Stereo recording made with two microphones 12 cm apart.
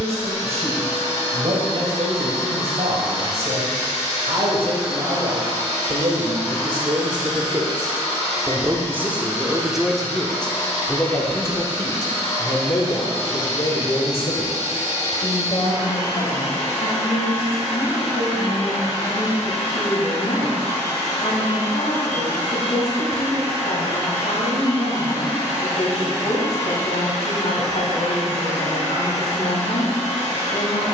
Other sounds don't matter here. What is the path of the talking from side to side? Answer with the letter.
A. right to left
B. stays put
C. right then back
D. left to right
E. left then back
A.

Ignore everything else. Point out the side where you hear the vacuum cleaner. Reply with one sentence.
You can hear the vacuum cleaner on the left.